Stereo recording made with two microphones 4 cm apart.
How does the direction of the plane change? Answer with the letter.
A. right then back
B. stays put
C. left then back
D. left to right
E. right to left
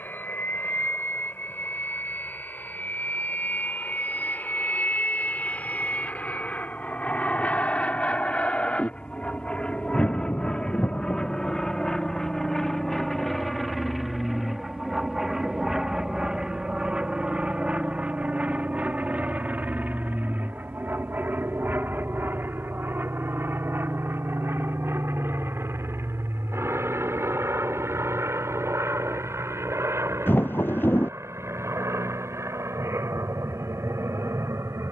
D.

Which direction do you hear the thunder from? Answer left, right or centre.
left.